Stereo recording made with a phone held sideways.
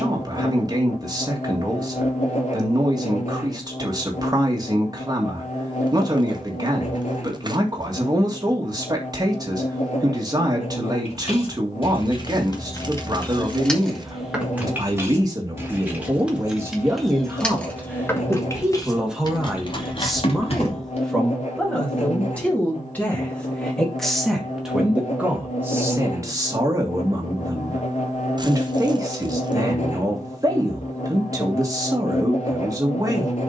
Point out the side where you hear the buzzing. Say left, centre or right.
left.